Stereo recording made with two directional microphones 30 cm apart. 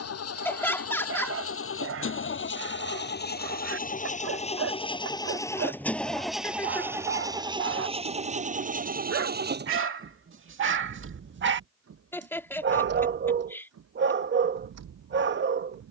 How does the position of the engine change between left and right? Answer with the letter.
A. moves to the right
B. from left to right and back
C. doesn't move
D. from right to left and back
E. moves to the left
A.